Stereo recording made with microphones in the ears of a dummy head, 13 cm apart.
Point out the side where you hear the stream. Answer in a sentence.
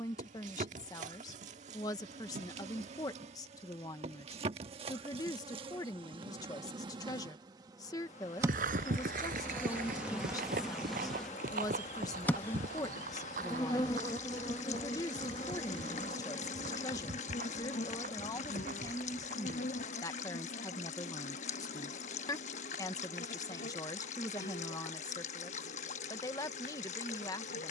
In this clip you hear the stream on the left.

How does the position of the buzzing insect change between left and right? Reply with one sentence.
In this clip you hear the buzzing insect go from the right side to the left.